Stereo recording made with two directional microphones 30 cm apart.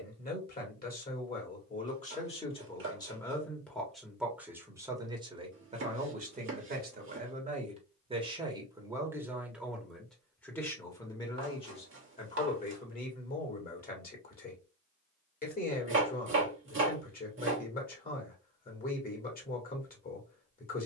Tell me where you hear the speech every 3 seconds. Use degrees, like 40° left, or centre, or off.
30° left, 10° right, 20° right, 10° left, 30° left, 30° left, 30° left.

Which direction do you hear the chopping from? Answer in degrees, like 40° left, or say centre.
40° right.